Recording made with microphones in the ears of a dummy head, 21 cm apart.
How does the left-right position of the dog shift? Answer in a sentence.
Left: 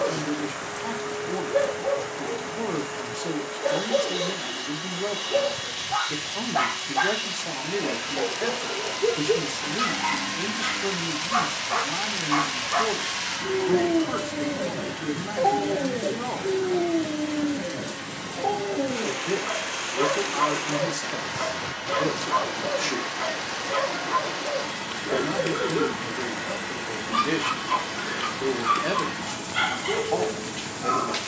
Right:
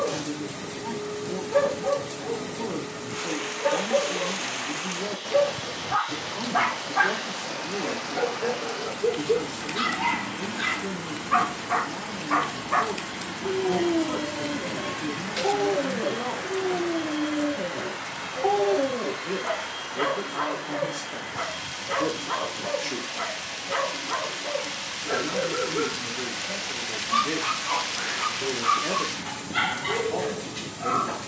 In this clip you hear the dog go left and come back.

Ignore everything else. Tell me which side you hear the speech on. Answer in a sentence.
You can hear the speech on the left.